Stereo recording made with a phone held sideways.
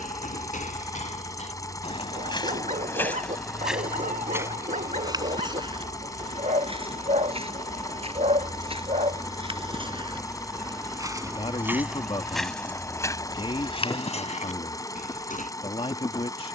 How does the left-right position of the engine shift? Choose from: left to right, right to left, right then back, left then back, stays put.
stays put.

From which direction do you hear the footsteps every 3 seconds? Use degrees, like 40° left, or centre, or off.
50° left, 20° right, 40° right, 30° right, 30° left, 70° left.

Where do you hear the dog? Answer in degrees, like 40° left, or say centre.
60° right.